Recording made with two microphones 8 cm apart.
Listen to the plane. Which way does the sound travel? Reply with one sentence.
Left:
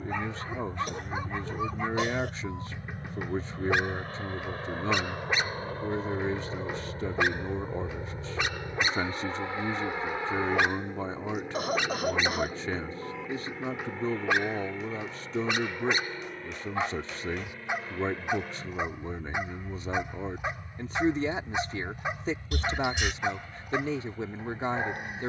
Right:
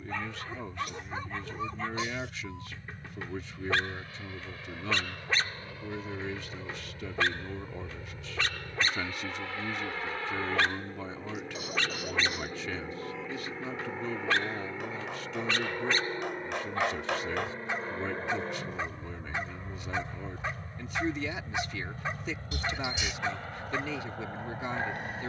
In this clip you hear the plane go from the left side to the right.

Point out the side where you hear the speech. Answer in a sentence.
In this clip you hear the speech on the left.